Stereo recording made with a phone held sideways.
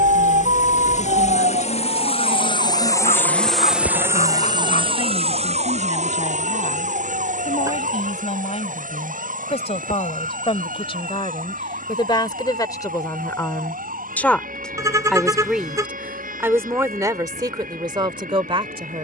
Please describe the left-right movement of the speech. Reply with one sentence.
In this clip you hear the speech move from left to right.